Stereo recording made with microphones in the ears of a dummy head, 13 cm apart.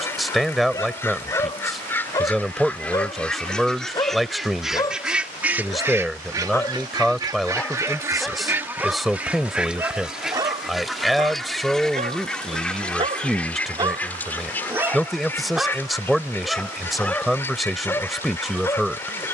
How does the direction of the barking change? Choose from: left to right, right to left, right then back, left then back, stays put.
right then back.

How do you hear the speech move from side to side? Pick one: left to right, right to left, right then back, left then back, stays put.
stays put.